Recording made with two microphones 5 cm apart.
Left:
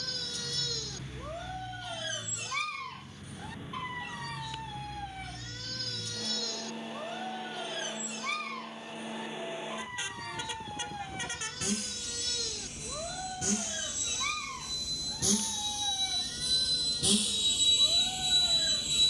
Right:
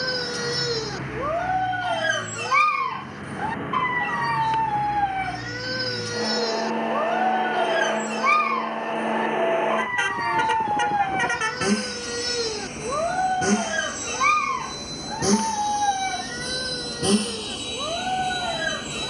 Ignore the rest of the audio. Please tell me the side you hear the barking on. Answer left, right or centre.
right.